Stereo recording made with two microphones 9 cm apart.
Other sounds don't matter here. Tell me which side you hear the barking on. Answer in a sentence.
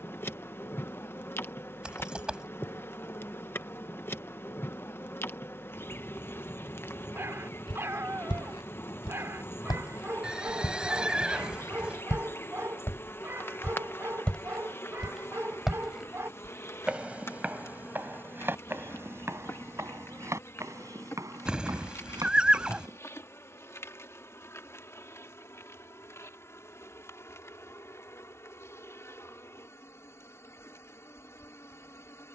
In this clip you hear the barking on the right.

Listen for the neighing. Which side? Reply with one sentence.
You can hear the neighing in the centre.